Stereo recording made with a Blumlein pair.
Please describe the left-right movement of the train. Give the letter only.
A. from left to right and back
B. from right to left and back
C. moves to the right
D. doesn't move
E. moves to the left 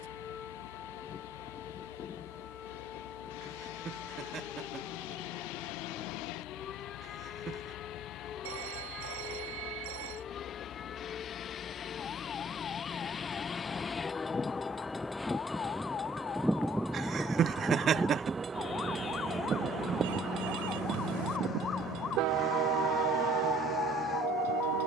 C.